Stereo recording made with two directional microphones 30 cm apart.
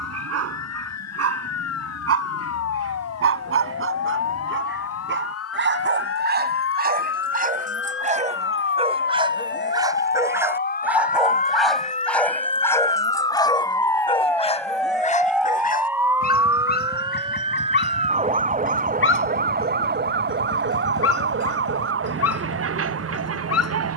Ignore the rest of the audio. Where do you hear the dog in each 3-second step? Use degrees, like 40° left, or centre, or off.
50° right, 40° right, 30° right, 10° right, 10° left, 30° left, 40° left, 50° left.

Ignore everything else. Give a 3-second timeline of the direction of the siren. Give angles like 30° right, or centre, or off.
60° left, 50° left, 40° left, 30° left, 10° left, 10° right, 30° right, 50° right.